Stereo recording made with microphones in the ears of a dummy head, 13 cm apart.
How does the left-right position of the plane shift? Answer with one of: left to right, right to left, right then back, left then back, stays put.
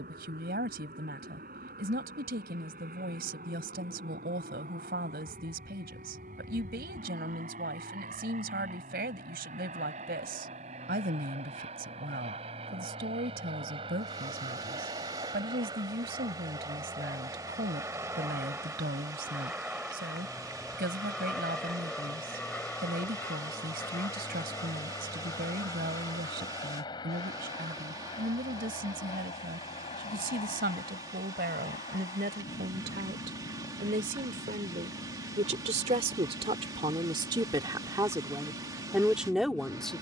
right to left.